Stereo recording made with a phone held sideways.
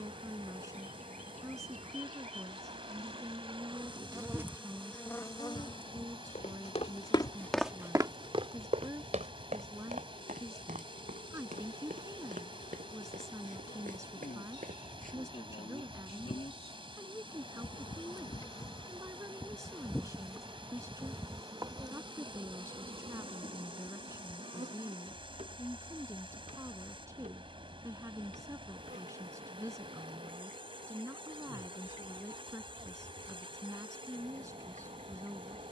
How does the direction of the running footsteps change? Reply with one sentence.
In this clip you hear the running footsteps move from left to right.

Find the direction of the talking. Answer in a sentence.
In this clip you hear the talking on the right.